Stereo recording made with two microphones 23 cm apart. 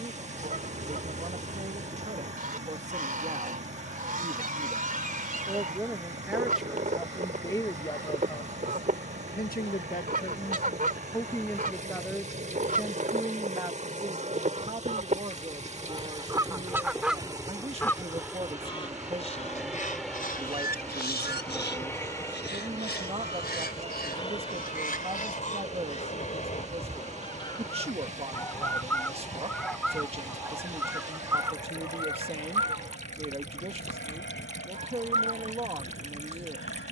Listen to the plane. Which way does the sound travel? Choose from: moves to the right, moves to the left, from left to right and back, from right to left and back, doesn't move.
moves to the left.